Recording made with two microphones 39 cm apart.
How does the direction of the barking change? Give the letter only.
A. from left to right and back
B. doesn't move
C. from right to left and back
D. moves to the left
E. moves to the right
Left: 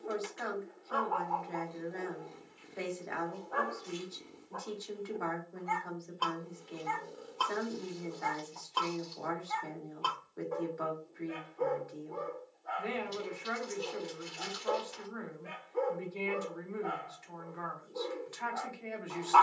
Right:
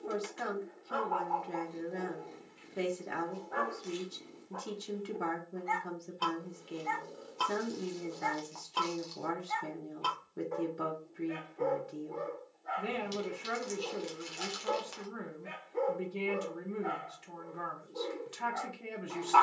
B.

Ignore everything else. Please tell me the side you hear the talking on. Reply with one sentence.
You can hear the talking on the right.